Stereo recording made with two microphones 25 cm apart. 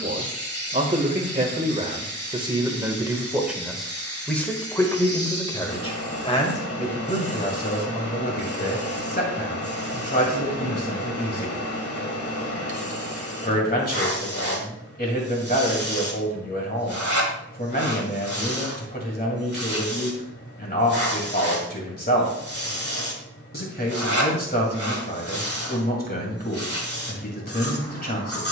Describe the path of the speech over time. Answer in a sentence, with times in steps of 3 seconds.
You can hear the speech on the right from 0 s, in the centre from 3 s and on the left from 6 s.